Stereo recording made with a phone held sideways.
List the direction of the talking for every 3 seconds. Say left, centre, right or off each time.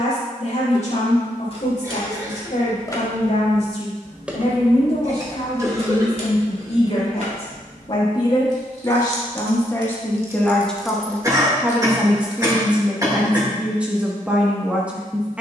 left, left, left, centre, centre.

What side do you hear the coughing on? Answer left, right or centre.
right.